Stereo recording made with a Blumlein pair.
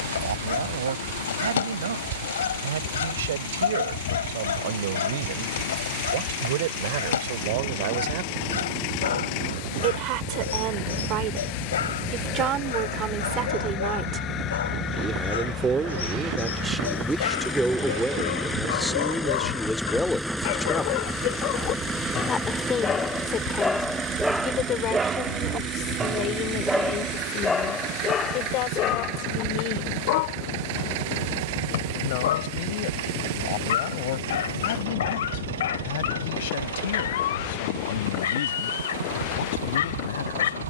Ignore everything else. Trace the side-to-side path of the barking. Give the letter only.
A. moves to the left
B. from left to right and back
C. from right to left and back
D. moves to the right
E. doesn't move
B.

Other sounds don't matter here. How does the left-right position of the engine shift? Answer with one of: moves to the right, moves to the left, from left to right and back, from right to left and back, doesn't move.
moves to the right.